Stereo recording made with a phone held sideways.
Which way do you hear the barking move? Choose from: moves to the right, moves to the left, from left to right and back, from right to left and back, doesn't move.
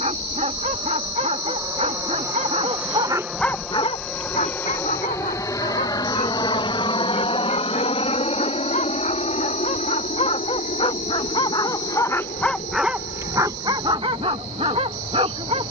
from right to left and back.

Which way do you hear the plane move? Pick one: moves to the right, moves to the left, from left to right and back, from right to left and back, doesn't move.
moves to the left.